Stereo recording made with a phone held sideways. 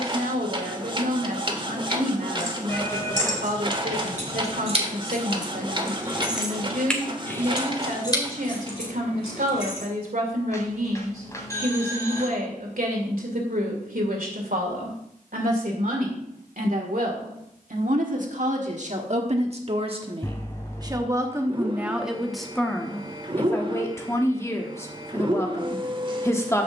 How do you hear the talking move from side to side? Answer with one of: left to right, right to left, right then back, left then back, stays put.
right to left.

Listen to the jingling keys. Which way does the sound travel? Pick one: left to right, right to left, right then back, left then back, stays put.
right to left.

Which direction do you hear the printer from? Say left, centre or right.
right.